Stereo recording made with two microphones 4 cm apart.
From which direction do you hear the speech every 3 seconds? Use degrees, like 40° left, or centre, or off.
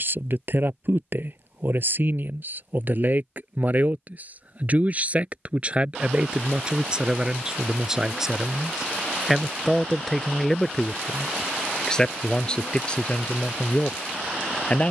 50° right, 30° right, 20° right, 10° left, 30° left.